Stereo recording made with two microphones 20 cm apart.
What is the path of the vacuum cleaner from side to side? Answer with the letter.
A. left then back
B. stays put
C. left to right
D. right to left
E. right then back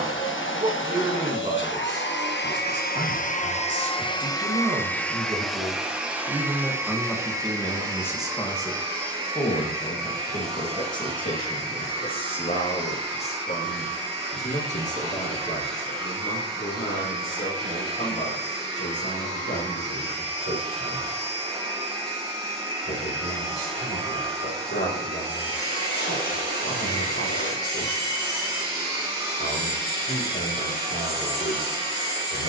C.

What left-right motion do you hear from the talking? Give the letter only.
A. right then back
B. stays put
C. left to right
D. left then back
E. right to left
E.